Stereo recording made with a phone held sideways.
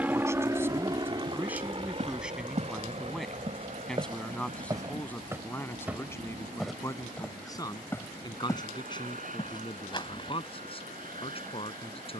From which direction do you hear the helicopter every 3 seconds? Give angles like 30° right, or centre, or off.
30° right, 40° right, 50° right, 50° right.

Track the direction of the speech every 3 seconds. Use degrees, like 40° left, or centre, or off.
10° right, 10° left, 20° left, 30° left.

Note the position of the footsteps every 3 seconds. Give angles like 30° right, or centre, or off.
50° right, 30° right, 10° left, 30° left.